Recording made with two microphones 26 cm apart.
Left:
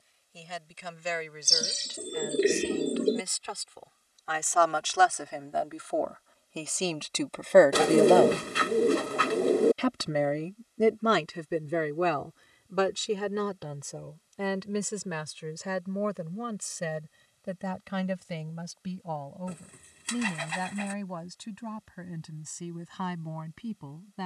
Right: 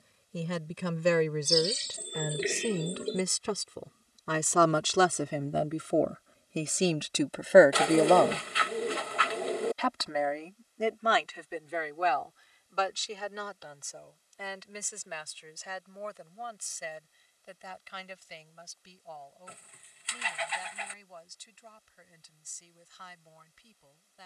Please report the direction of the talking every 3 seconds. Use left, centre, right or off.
right, right, centre, left, left, left, left, left.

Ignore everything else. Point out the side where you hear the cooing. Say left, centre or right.
left.